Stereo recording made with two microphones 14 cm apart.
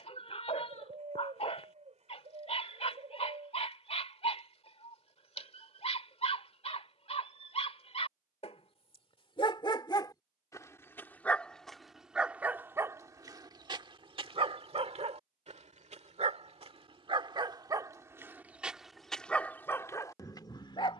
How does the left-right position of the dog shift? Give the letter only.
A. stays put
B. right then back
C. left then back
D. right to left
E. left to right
B.